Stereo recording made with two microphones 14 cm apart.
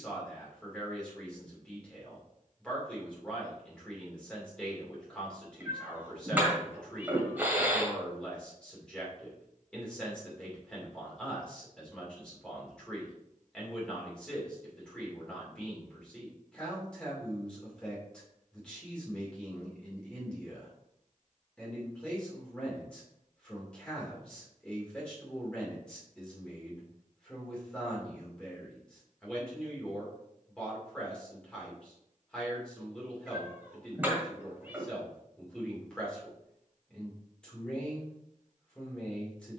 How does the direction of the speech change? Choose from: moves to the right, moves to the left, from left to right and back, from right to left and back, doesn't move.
doesn't move.